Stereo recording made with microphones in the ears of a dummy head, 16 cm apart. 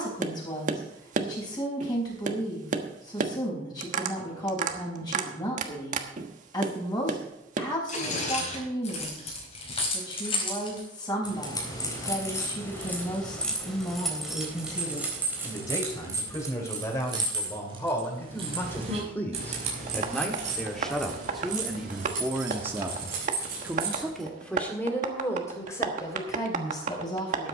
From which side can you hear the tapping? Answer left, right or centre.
right.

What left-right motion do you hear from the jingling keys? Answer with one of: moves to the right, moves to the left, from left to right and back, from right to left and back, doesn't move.
moves to the right.